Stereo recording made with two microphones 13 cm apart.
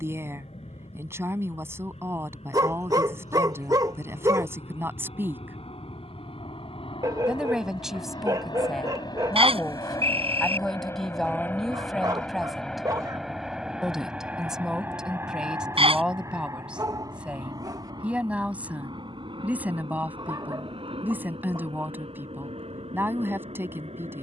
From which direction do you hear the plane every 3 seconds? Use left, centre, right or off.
left, left, left, left, centre, right, right, right.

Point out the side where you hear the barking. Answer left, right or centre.
right.